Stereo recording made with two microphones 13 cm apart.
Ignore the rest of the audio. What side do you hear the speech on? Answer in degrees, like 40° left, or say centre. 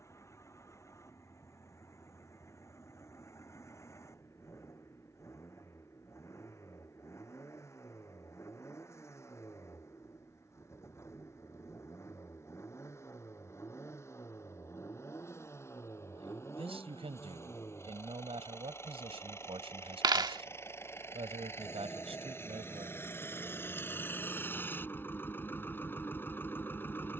50° right.